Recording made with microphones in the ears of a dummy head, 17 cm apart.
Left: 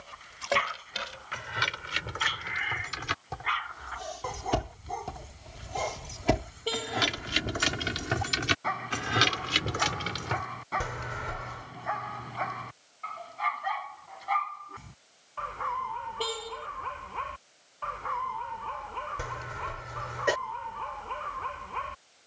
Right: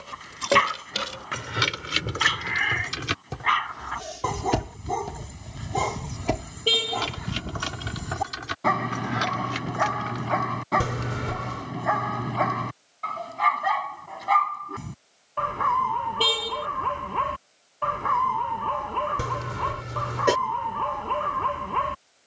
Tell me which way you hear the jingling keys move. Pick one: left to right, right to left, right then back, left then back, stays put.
right to left.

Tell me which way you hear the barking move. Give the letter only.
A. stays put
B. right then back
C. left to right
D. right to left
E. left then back
A.